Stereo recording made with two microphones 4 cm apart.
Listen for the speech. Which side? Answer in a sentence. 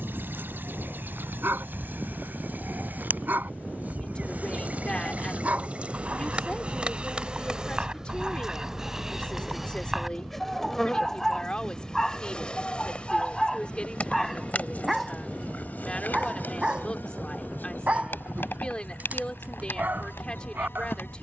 In this clip you hear the speech on the left.